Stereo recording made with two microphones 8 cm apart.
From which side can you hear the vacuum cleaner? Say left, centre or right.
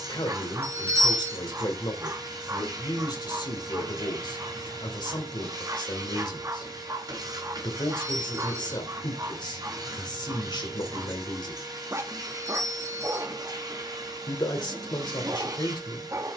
right.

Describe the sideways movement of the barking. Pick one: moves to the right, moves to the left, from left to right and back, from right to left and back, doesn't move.
doesn't move.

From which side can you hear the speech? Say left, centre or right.
left.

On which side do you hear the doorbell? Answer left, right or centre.
right.